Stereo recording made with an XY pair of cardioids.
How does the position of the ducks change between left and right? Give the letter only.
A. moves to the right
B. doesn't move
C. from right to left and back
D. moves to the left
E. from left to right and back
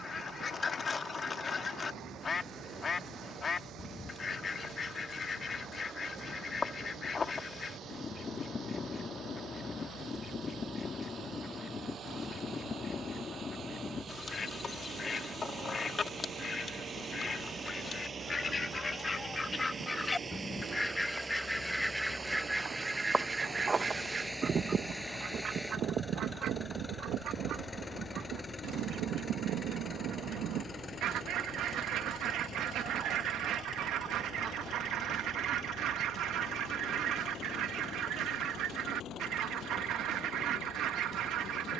A.